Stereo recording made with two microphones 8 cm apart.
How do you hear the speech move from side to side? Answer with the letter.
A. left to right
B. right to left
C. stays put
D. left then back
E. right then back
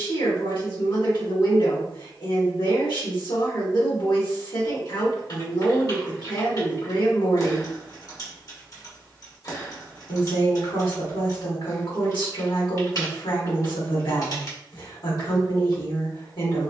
C.